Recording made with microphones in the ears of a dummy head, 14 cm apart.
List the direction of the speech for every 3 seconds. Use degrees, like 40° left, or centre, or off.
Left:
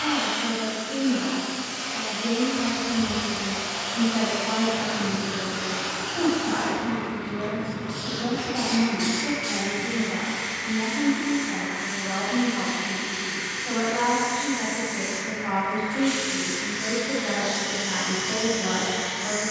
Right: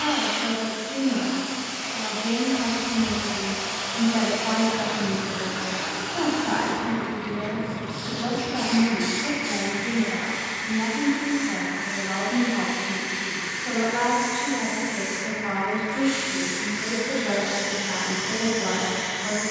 40° right, 40° right, 40° right, 30° right, 10° right, centre, 10° left.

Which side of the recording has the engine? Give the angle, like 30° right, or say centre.
10° right.